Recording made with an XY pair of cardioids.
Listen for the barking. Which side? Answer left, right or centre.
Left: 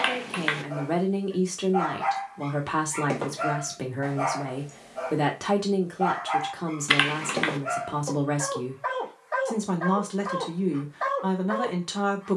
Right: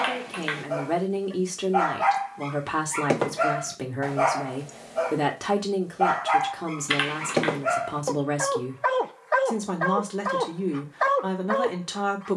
right.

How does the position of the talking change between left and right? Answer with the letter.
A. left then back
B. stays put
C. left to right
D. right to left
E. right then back
B.